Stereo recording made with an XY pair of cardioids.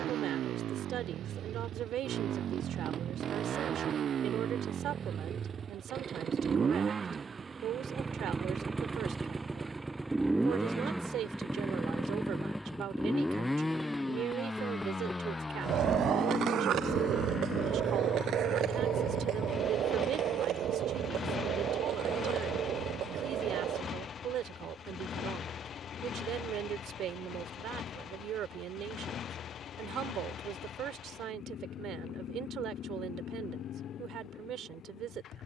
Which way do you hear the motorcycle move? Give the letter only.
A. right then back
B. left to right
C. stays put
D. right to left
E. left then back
D.